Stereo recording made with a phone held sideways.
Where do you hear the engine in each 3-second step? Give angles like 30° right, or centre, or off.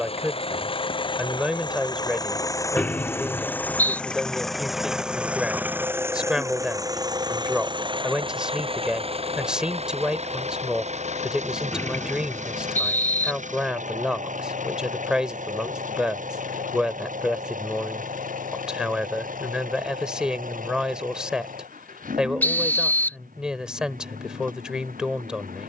30° left, centre, 30° right, 50° right, 60° right, 70° right, 70° right, 80° right, 80° right.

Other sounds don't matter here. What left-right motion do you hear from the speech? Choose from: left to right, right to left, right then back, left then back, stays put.
stays put.